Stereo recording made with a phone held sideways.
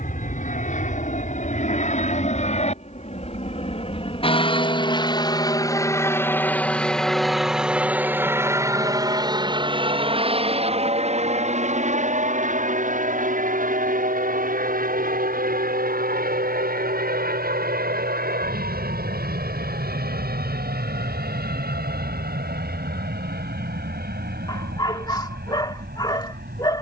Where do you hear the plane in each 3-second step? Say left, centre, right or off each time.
left, left, centre, right, right, right, right, right, right.